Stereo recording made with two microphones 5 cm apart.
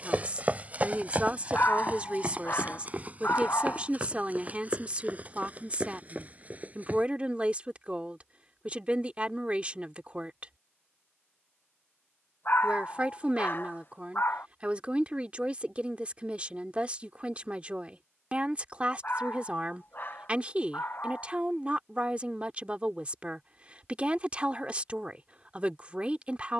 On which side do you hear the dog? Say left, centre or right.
left.